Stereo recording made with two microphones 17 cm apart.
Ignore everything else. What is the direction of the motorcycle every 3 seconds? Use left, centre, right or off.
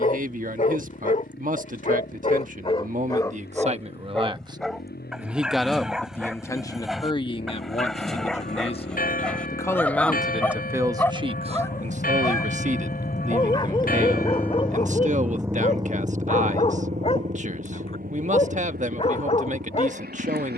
left, left, left, left, left, right, right.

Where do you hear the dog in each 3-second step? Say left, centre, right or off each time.
left, centre, centre, centre, left, left, left.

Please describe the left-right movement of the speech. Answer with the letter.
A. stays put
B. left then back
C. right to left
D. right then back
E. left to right
B.